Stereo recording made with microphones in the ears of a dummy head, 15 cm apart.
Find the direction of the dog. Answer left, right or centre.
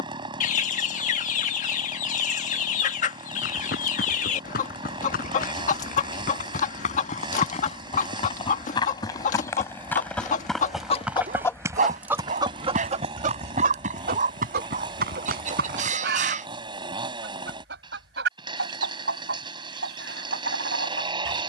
right.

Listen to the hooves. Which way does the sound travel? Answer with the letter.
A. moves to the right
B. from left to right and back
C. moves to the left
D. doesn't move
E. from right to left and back
A.